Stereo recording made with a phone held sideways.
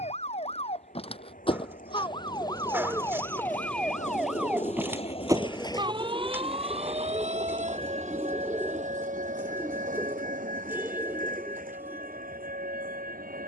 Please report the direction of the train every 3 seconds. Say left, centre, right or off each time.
left, left, right, right, right.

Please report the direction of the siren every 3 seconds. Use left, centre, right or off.
left, centre, right, right, right.